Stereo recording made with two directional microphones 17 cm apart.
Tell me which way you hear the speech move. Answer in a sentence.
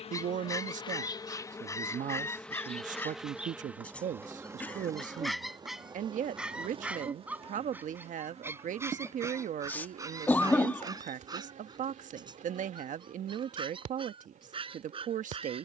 In this clip you hear the speech stay in one place.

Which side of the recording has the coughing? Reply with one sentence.
In this clip you hear the coughing in the centre.